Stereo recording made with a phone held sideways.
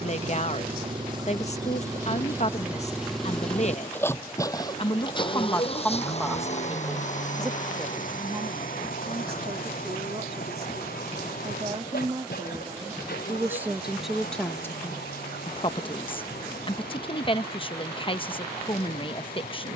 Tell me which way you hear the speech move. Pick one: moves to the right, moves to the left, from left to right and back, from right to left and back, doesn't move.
from left to right and back.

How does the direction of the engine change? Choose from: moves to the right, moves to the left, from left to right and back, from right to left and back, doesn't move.
moves to the left.